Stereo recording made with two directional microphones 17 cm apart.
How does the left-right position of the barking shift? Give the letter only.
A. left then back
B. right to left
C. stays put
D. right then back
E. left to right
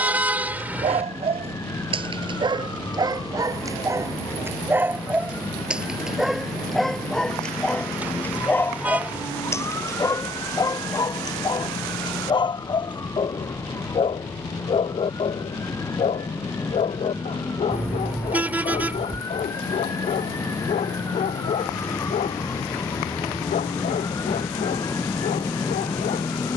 B.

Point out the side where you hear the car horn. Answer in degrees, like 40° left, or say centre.
10° right.